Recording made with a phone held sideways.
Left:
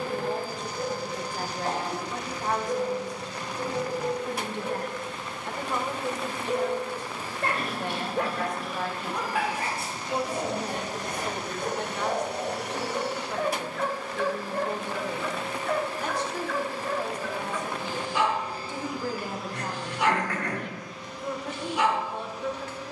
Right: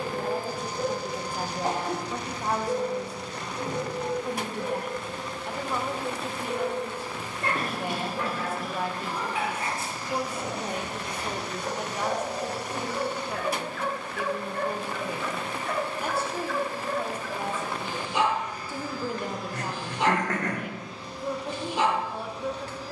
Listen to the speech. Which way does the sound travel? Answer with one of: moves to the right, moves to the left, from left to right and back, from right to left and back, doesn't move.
doesn't move.